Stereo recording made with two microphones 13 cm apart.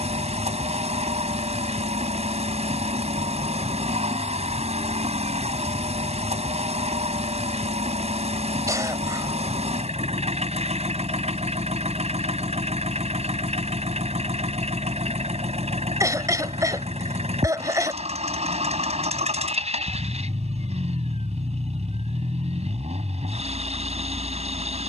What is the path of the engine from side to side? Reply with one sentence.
In this clip you hear the engine stay in one place.